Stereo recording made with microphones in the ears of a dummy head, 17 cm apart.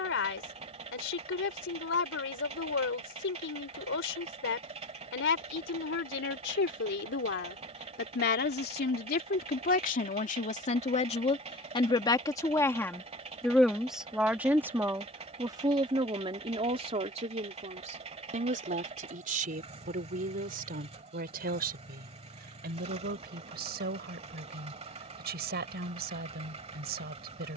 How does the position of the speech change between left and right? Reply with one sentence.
You can hear the speech move to the right.